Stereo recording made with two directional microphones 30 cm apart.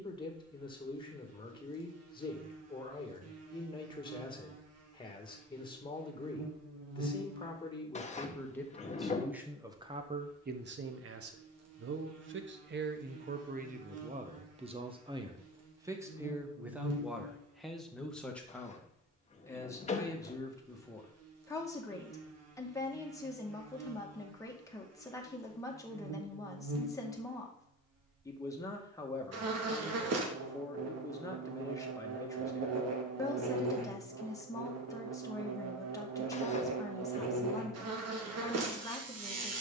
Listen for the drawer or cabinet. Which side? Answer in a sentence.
In this clip you hear the drawer or cabinet on the left.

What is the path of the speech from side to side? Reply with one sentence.
You can hear the speech go right and come back.